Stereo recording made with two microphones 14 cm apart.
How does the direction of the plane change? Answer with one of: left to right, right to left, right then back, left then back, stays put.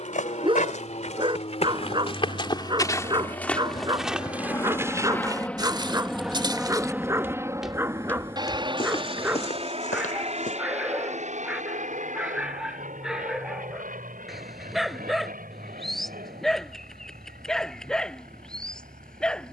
left to right.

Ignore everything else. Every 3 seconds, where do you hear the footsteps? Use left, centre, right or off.
left, centre, centre, left, off, off, off.